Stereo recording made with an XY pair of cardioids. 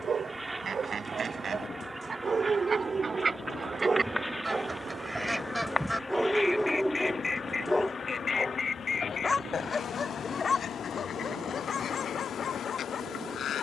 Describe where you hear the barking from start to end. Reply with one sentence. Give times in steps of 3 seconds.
You can hear the barking on the right from 0 s, in the centre from 6 s and on the left from 9 s.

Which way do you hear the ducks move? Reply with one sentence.
You can hear the ducks travel towards the left.